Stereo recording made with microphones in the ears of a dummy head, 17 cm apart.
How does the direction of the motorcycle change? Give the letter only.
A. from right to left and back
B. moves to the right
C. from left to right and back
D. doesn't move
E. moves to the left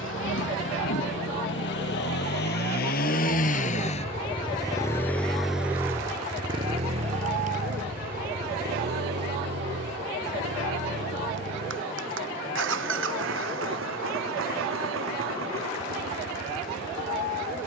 B.